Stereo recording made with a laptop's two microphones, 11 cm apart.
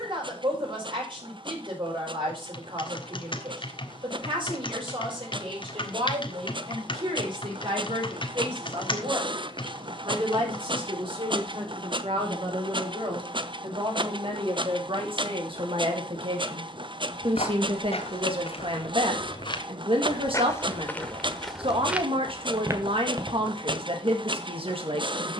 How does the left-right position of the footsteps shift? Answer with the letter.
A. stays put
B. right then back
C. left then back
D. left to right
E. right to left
D.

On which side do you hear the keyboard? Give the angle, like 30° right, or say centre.
50° left.